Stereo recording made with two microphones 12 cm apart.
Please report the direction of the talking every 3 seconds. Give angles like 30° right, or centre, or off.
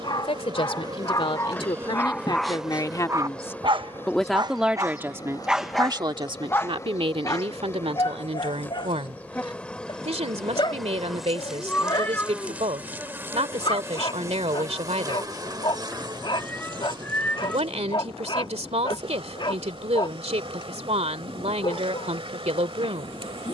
50° left, 10° right, 60° right, 70° right, 70° right, 70° right, 70° right, 70° right.